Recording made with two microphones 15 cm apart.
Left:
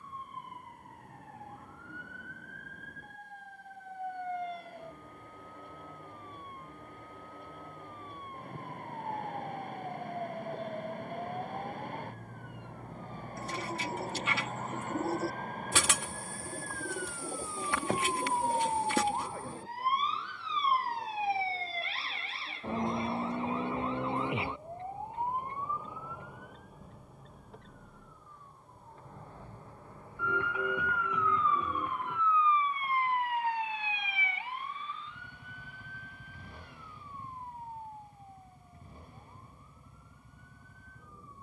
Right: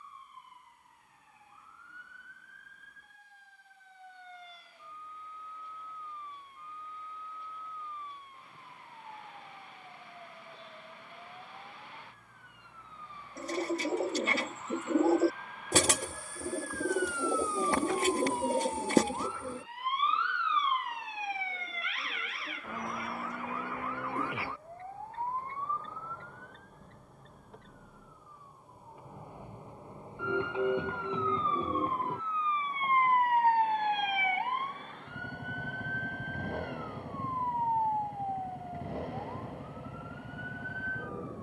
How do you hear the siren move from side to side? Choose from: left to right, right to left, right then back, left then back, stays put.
left to right.